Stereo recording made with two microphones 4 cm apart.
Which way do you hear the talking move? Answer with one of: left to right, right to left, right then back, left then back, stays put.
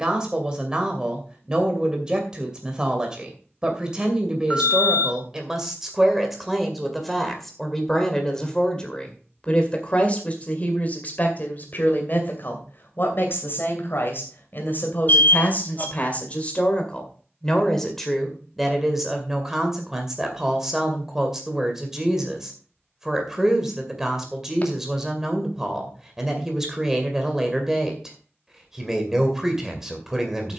left then back.